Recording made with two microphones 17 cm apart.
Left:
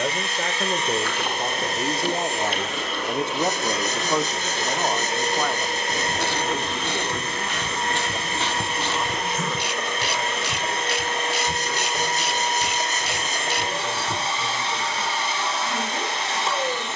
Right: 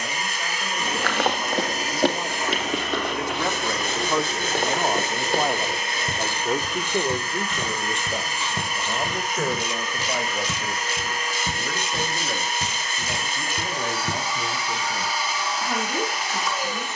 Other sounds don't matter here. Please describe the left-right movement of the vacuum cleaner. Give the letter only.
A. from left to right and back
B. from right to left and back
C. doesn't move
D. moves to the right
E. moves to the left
C.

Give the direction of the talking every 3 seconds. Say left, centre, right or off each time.
left, centre, right, right, right, right.